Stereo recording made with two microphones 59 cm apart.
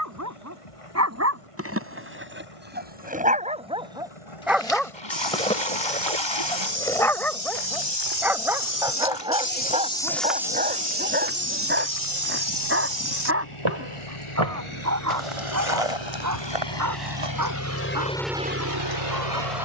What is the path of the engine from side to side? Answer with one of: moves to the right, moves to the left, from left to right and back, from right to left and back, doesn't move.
moves to the right.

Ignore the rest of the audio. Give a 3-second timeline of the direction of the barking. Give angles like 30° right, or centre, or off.
20° right, centre, centre, 10° right, 20° right, 30° right, 30° right.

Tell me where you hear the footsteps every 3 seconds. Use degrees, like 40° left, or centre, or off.
off, 70° left, 50° left, 10° right, 50° right, 60° right, off.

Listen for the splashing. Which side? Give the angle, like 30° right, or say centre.
50° left.